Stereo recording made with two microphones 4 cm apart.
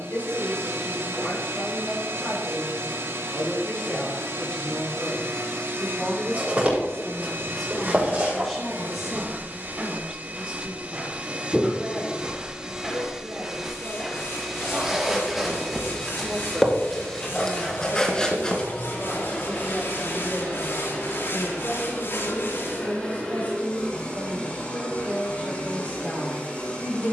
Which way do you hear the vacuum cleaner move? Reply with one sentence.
In this clip you hear the vacuum cleaner travel towards the left.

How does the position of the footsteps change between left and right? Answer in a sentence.
You can hear the footsteps move to the left.